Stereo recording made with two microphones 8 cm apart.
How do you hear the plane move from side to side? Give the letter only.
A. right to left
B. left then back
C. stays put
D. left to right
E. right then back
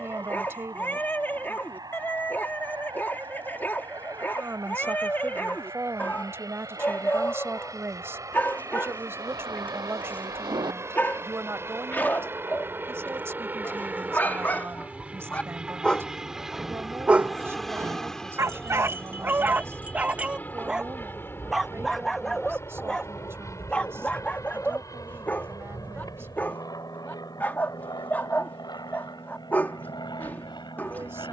A.